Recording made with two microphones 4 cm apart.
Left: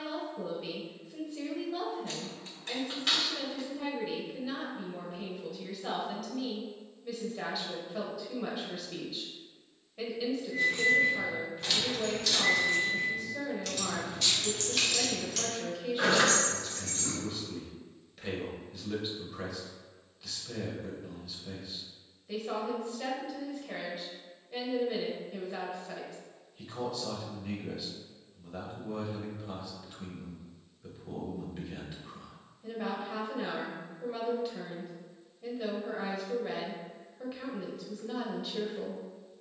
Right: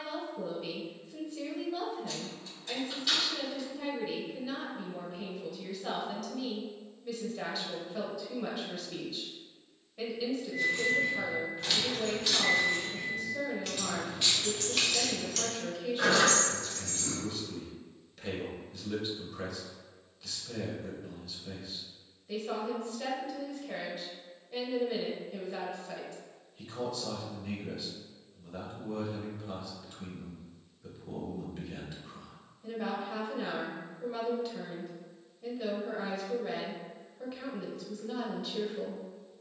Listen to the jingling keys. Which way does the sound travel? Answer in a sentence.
You can hear the jingling keys move from left to right and back again.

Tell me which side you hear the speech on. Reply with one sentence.
In this clip you hear the speech in the centre.